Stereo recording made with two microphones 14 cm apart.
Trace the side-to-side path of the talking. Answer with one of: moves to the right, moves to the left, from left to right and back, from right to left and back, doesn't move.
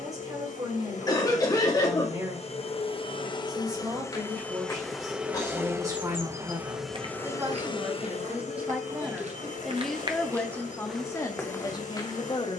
moves to the left.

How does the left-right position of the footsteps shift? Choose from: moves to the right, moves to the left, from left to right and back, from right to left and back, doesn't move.
from left to right and back.